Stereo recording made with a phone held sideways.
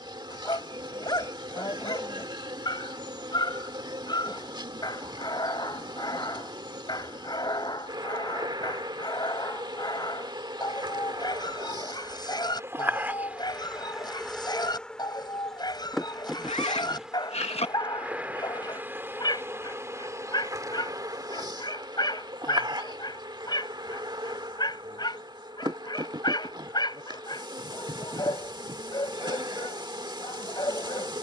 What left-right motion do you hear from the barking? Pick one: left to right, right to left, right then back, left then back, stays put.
stays put.